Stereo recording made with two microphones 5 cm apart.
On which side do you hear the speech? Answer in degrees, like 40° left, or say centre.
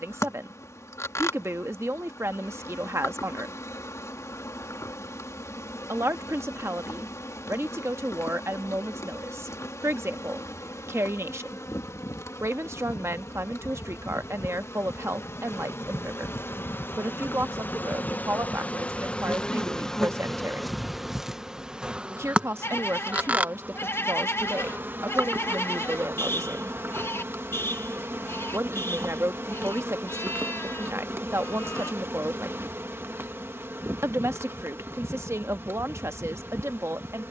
60° right.